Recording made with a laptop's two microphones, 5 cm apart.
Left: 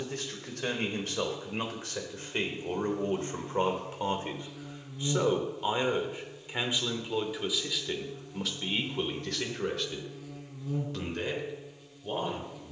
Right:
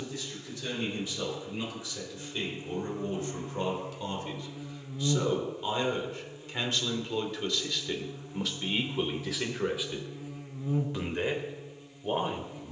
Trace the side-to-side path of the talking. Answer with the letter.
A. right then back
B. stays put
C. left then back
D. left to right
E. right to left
D.